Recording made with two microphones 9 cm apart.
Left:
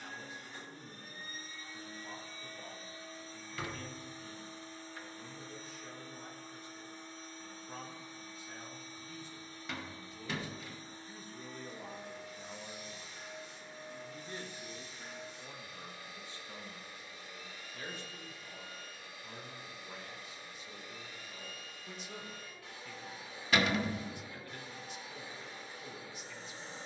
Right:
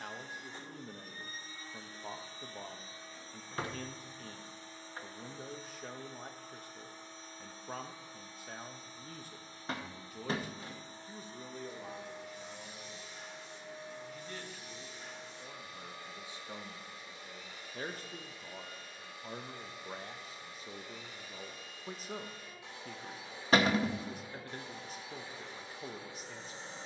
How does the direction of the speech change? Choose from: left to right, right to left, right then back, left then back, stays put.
left then back.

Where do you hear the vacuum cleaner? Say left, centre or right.
right.